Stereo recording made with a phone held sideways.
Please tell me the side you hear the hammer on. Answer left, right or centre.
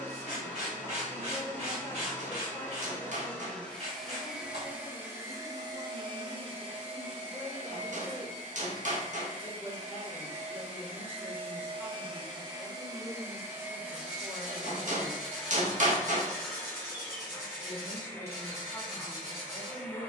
right.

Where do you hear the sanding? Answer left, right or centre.
right.